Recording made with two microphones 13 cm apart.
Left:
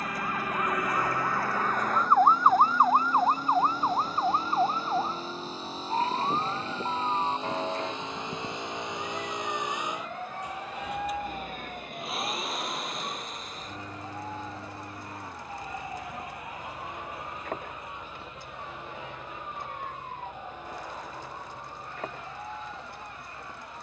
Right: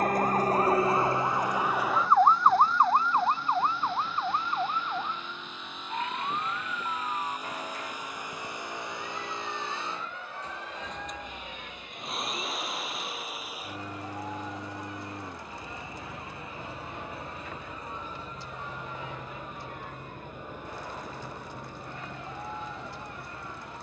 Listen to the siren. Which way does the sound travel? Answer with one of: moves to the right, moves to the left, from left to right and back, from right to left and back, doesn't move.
moves to the left.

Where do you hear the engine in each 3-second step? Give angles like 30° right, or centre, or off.
40° left, 40° left, 30° left, 10° left, 10° right, 30° right, 40° right, 60° right.